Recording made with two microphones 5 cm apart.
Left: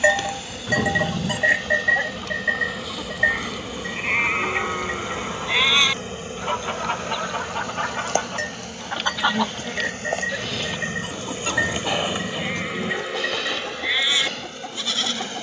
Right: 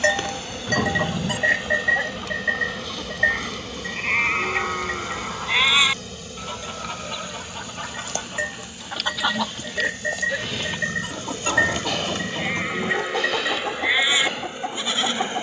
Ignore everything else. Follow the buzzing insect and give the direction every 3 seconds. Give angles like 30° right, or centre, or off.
10° right, 20° left, 40° left, 40° left, 10° right.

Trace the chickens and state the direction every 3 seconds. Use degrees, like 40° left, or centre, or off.
10° right, 40° left, 40° left, 10° right, 30° right.